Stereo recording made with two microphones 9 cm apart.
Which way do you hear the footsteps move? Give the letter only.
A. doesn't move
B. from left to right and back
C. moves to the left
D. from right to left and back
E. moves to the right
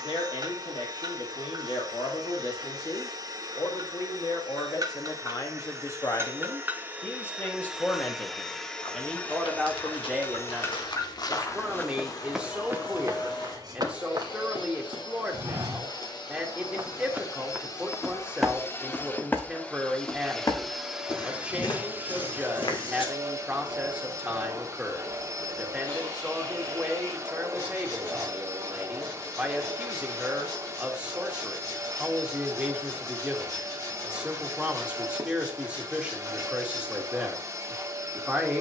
B.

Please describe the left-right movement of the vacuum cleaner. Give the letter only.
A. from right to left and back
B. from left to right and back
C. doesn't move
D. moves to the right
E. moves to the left
A.